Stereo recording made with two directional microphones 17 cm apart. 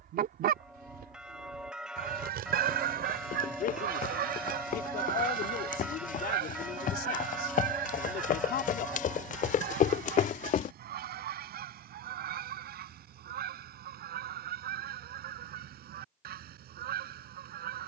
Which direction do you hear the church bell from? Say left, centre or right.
centre.